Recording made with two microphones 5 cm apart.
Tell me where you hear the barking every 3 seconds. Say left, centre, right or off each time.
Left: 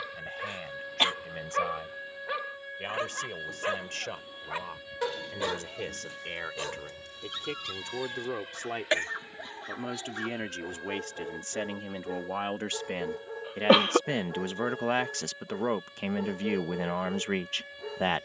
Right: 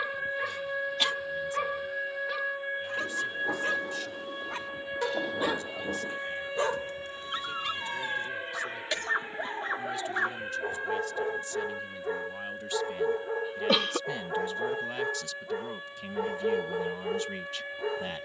centre, centre, right, right, right, right.